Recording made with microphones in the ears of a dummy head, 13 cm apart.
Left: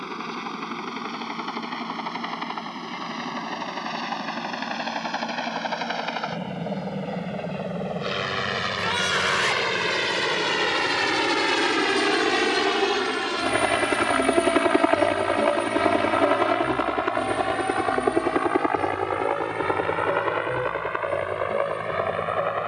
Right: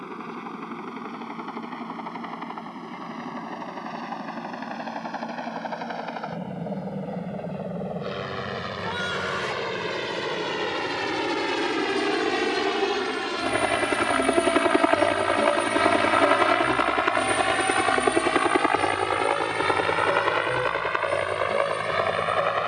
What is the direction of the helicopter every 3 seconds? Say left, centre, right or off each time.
left, left, left, left, centre, right, right, right.